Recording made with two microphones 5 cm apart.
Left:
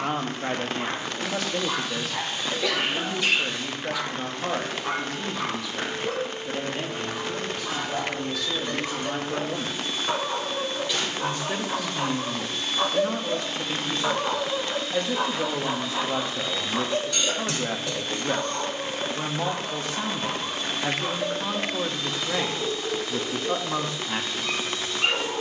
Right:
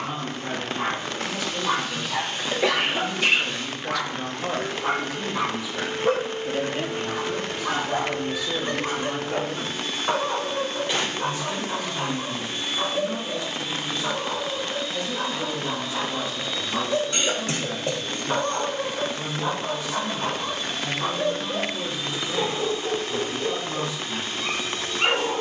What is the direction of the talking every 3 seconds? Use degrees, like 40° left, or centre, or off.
50° left, 10° left, 20° right, 40° left, 50° left, 50° left, 50° left, 50° left, 50° left.